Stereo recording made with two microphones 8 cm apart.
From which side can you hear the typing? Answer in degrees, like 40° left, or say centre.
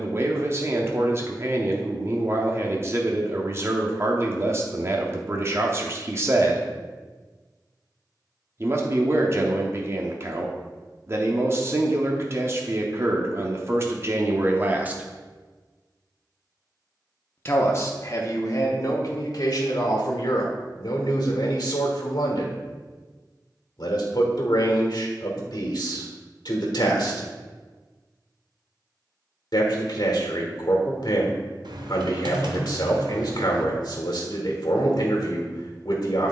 70° right.